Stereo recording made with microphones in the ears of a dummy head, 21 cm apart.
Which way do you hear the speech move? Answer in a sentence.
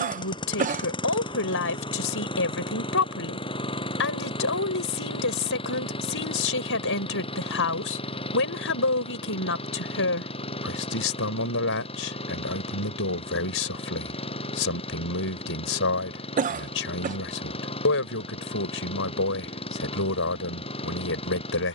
You can hear the speech stay in one place.